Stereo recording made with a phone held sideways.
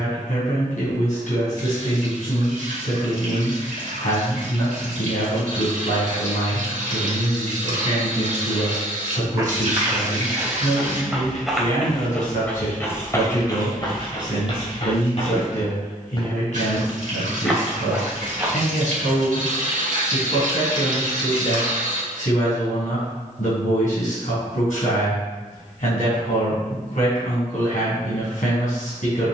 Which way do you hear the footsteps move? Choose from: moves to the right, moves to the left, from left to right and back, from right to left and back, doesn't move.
from right to left and back.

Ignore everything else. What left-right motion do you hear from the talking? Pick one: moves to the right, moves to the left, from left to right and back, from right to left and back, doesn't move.
doesn't move.